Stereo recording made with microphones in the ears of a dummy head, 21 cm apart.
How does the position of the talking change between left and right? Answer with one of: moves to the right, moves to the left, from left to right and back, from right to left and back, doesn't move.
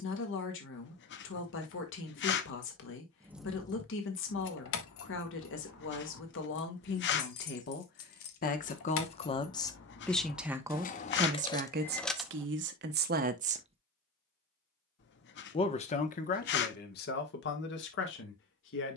from left to right and back.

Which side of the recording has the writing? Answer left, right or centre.
left.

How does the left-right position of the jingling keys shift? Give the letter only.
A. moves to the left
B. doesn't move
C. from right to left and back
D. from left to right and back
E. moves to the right
C.